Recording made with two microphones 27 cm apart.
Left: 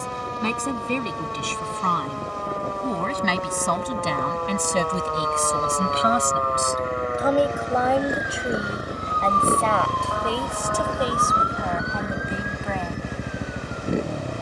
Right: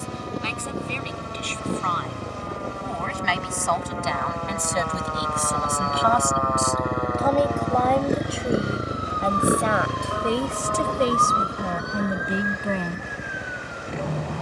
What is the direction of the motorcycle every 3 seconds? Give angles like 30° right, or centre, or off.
70° right, 60° right, 40° right, centre, 40° left.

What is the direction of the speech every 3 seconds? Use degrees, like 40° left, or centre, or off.
50° left, 40° left, 10° left, 20° right, 40° right.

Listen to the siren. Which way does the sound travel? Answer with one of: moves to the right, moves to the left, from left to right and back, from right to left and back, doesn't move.
moves to the right.